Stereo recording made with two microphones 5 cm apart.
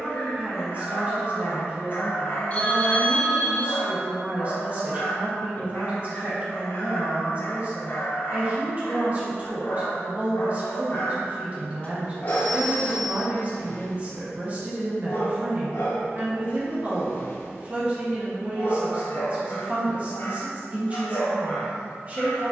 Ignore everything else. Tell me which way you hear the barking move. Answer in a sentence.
In this clip you hear the barking stay in one place.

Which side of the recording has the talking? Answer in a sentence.
You can hear the talking on the right.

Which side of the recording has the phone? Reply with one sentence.
You can hear the phone on the left.